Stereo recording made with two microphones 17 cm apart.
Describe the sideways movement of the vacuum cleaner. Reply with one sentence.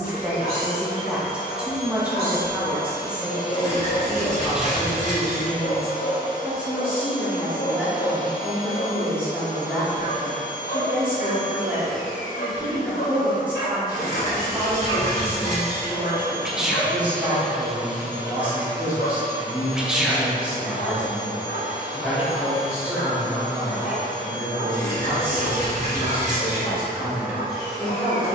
In this clip you hear the vacuum cleaner go from the left side to the right.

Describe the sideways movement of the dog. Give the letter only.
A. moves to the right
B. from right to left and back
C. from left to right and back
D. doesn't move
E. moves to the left
D.